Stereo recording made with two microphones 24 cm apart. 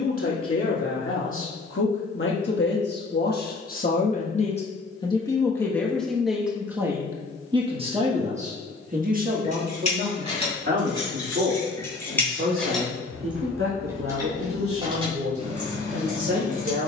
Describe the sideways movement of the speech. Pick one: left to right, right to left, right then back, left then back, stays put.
left to right.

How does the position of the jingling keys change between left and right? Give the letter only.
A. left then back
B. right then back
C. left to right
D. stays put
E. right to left
C.